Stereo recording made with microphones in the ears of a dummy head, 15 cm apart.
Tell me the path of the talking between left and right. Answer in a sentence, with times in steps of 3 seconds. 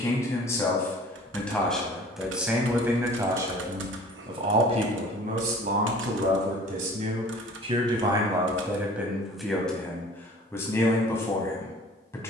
In this clip you hear the talking in the centre from 0 s, on the right from 3 s and in the centre from 9 s.